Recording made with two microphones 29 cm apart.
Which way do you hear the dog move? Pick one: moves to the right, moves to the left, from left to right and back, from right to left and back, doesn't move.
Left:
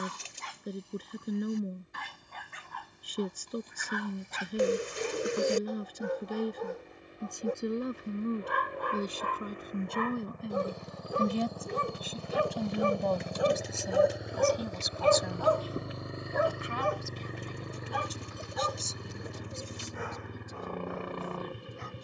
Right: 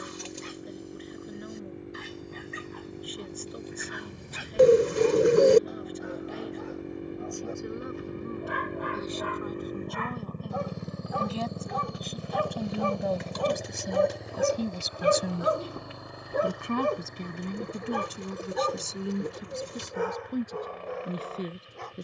moves to the right.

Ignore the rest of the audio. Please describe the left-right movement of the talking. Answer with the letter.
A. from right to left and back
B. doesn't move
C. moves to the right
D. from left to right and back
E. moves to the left
C.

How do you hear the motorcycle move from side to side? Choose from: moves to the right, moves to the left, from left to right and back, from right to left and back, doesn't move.
moves to the left.